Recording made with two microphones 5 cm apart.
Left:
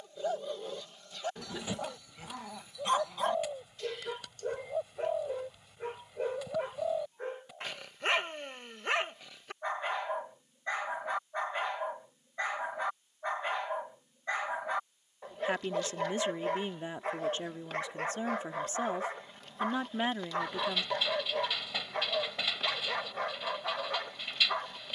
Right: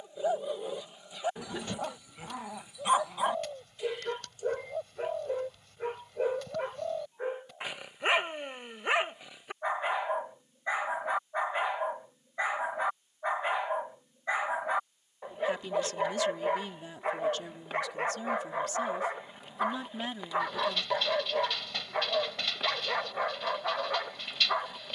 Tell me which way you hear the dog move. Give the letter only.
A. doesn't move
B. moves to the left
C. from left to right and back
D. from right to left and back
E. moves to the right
A.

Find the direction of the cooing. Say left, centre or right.
centre.